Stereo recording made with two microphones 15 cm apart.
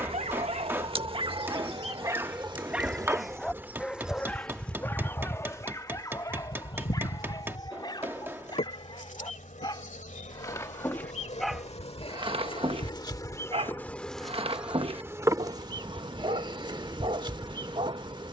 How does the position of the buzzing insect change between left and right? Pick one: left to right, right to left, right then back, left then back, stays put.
left then back.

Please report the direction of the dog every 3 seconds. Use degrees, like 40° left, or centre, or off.
30° right, 10° left, 30° left, 20° left, 40° right, 40° right.